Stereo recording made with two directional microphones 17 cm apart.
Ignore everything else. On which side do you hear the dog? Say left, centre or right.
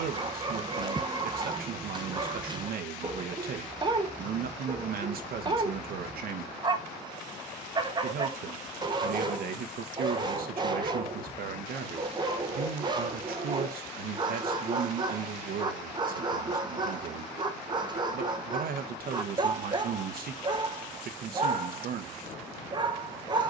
right.